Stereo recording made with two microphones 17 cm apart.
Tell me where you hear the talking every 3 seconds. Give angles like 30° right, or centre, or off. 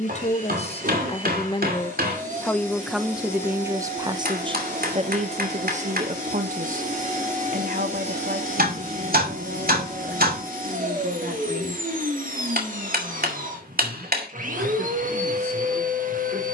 30° left, 30° right, 60° right, 70° right, 80° right, 80° right.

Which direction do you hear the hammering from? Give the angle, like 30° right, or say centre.
70° right.